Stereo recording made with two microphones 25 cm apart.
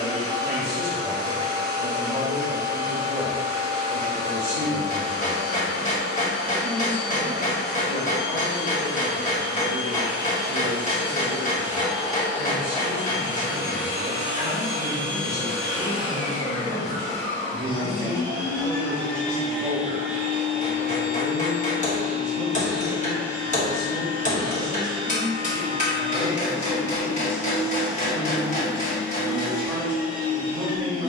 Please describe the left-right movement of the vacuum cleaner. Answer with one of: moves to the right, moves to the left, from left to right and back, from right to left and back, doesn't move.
from right to left and back.